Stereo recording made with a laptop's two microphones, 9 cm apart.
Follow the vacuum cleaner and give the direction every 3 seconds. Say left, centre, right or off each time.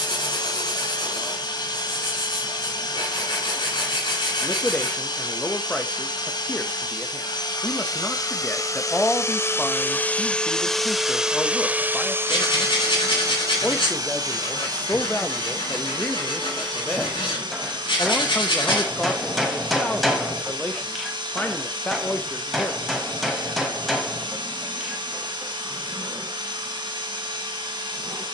left, left, left, centre, right, right, right, right, right, right.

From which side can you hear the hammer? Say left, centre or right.
centre.